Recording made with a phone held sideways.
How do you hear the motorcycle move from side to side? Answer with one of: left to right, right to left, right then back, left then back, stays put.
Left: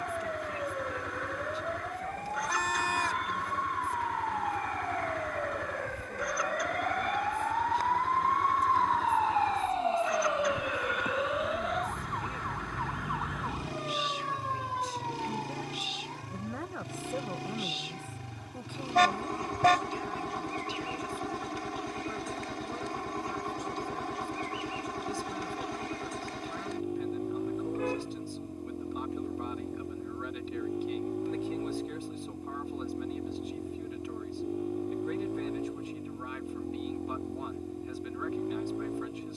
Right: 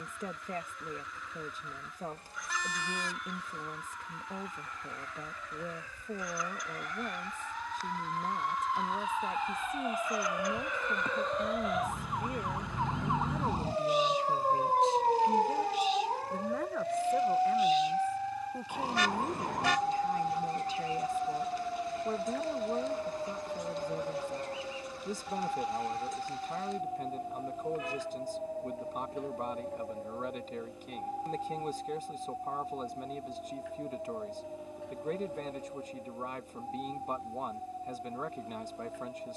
stays put.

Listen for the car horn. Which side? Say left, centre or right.
left.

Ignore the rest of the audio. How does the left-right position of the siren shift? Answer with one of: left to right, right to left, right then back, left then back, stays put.
left to right.